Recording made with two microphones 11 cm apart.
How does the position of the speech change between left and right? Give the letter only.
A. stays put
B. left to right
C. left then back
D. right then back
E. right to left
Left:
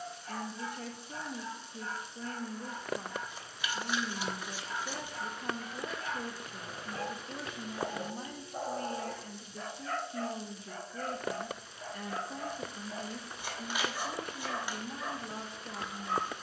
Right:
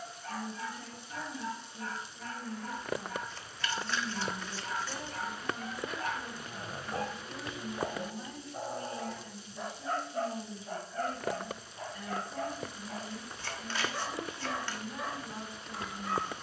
A.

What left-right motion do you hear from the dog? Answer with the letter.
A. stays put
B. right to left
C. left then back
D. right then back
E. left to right
C.